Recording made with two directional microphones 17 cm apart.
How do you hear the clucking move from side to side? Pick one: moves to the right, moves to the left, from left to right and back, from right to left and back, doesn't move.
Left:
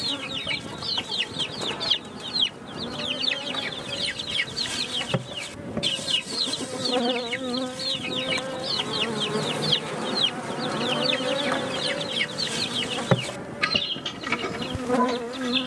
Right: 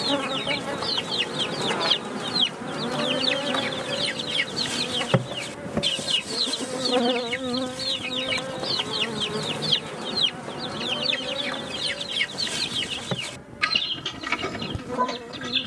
doesn't move.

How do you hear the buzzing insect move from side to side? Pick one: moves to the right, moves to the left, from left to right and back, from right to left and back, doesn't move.
moves to the left.